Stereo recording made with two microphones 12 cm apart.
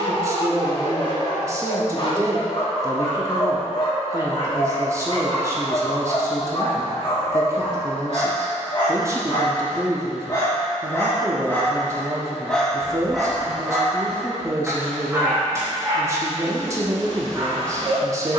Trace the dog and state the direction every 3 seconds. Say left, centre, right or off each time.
left, left, left, left, centre, right.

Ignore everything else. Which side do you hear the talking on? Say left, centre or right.
right.